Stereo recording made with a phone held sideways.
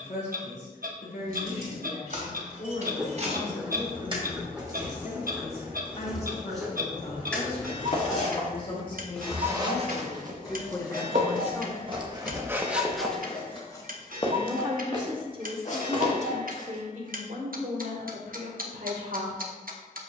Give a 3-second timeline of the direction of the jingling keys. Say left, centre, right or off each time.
right, right, centre, left, left, off, off.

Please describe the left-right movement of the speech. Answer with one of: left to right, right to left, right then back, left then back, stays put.
left to right.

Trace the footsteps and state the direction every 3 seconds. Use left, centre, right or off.
off, off, left, right, centre, left, off.